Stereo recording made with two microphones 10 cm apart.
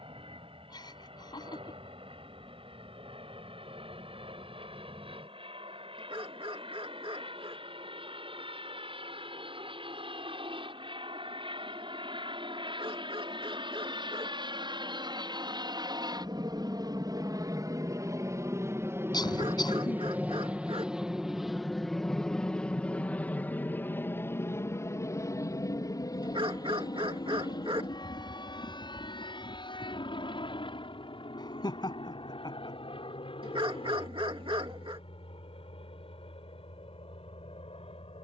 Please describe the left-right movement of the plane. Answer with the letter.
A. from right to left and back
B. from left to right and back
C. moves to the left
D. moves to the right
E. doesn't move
C.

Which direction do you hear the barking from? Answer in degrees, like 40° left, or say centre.
60° right.